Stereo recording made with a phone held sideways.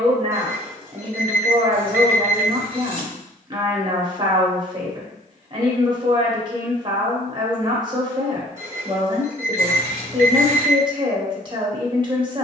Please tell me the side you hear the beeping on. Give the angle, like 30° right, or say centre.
30° right.